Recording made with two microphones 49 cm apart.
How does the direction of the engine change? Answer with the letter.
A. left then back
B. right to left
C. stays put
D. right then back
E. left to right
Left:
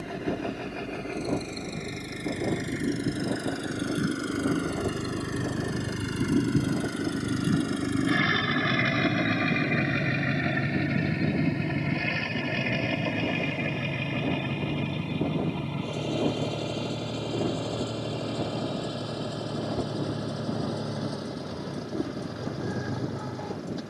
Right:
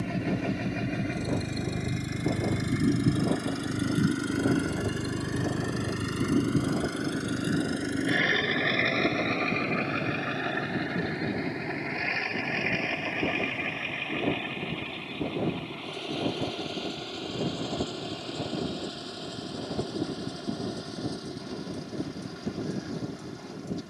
B.